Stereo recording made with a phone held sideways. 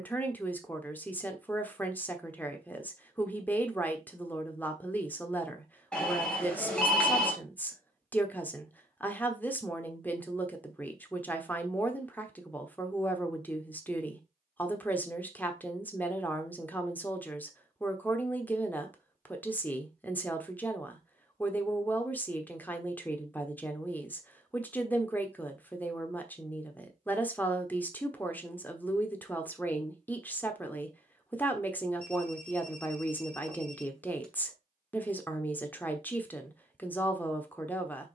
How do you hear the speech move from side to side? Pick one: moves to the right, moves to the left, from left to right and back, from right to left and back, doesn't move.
doesn't move.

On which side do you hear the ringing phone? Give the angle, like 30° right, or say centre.
10° left.